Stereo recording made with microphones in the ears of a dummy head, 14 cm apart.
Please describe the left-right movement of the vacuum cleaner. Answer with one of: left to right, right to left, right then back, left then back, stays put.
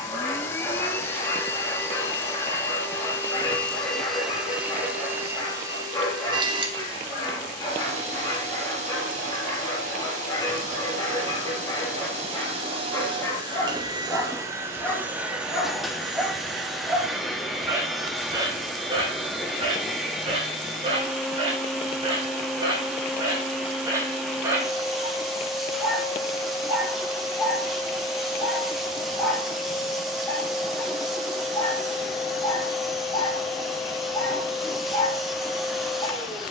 right then back.